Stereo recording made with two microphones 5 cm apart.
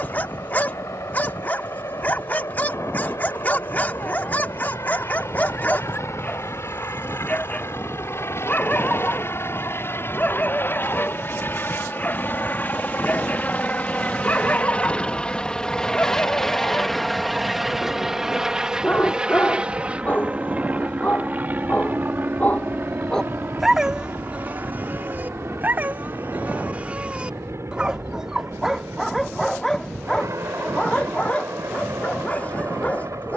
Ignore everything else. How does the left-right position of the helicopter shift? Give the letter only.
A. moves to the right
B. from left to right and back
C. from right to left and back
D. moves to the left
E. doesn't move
A.